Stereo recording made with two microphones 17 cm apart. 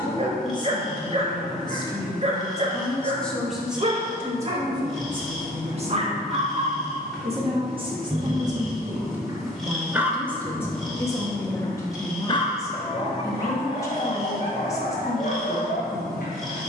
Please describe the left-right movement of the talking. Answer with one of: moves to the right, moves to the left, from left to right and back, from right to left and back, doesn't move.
from left to right and back.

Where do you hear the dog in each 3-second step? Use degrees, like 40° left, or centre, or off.
40° right, 40° right, 40° right, centre, 50° left, 60° left.